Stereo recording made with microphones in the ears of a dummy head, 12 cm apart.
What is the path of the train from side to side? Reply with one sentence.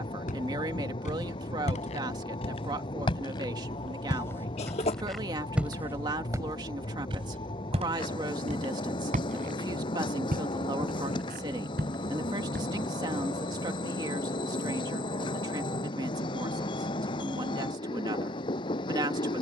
You can hear the train stay in one place.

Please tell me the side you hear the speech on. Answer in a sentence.
You can hear the speech on the right.